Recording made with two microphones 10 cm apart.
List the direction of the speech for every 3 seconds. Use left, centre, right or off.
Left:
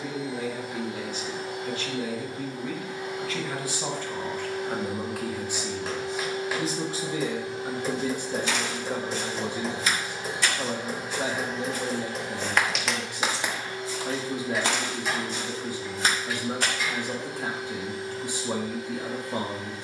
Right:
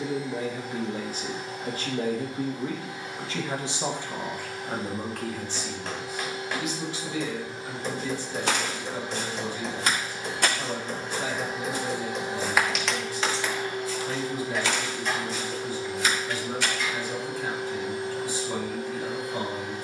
right, centre, left, left, left, left, left.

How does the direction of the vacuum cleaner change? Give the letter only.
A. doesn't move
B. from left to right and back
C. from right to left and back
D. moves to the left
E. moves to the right
E.